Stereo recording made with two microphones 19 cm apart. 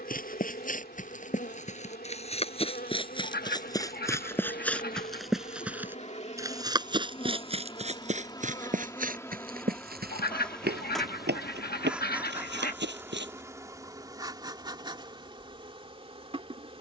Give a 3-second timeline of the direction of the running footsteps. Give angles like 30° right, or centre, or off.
40° left, 10° left, 30° right, 60° right, 70° right, off.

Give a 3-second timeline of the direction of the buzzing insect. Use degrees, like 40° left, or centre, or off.
50° left, 50° left, 30° left, centre, 20° right, 30° right.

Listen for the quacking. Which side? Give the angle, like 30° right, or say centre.
60° left.